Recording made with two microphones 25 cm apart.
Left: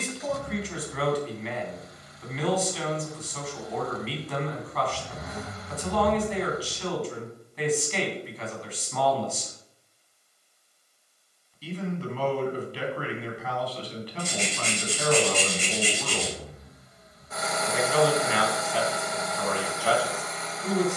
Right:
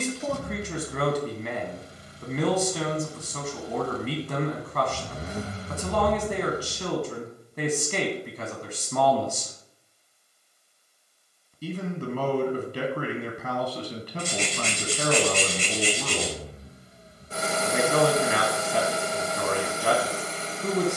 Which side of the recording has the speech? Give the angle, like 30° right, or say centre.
50° right.